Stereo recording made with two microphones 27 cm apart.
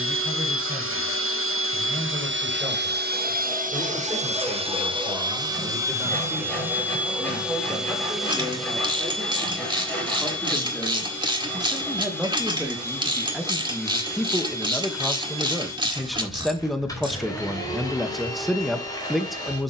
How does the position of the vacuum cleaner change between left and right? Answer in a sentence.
In this clip you hear the vacuum cleaner travel towards the left.